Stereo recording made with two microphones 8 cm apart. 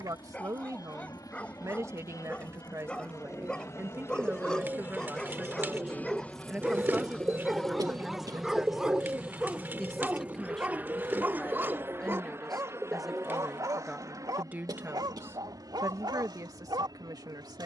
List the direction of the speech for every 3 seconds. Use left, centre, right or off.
right, right, centre, centre, centre, right.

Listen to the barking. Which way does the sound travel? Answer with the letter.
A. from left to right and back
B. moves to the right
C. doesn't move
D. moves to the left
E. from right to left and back
B.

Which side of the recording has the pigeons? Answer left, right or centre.
right.